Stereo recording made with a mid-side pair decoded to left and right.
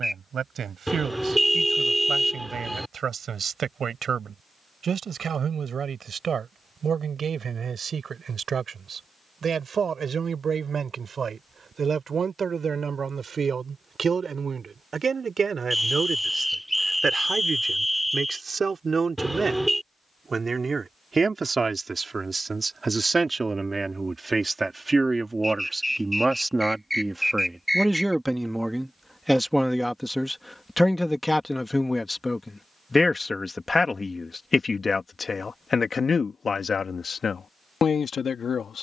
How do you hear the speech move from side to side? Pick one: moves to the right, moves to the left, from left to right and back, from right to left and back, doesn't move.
moves to the left.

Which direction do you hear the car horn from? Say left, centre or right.
centre.